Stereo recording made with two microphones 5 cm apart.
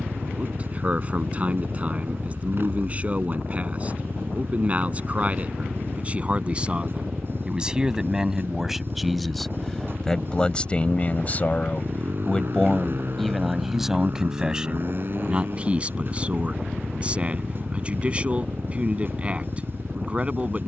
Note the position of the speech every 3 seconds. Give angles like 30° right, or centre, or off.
30° right, 30° right, 20° right, 20° left, centre, 30° right, 30° right.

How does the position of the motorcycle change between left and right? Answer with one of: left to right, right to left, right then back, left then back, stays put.
stays put.